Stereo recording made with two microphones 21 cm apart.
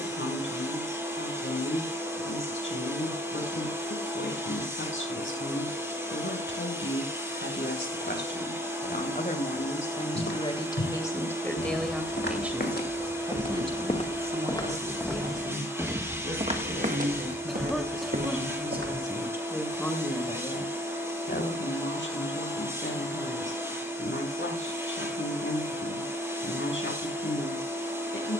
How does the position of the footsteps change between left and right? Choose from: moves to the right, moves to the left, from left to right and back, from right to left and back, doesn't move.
moves to the right.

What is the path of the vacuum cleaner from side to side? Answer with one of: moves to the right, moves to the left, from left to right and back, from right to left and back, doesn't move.
doesn't move.